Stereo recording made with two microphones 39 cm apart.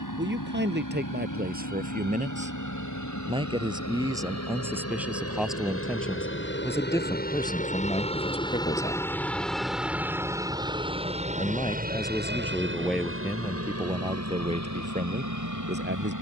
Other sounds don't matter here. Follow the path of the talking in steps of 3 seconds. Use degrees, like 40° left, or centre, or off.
20° right, 10° right, 10° left, 10° left, 10° right, 30° right.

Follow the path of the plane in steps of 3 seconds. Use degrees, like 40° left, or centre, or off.
60° left, 40° left, 20° left, 10° right, 30° right, 40° right.